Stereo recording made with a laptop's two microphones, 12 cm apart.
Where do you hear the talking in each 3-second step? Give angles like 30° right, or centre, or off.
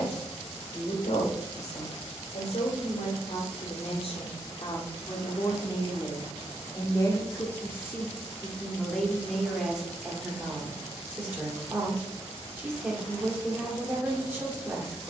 70° left, 50° left, 20° left, 10° right, 20° right.